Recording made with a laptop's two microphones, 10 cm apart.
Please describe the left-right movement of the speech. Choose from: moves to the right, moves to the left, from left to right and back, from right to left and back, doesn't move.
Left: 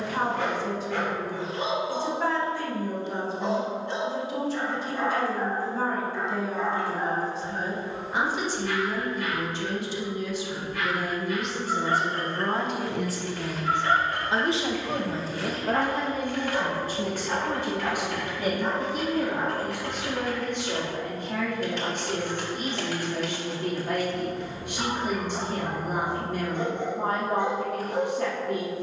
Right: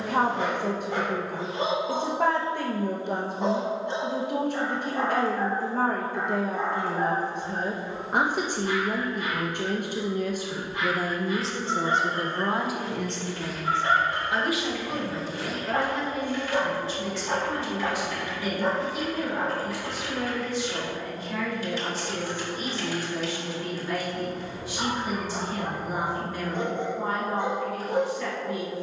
moves to the left.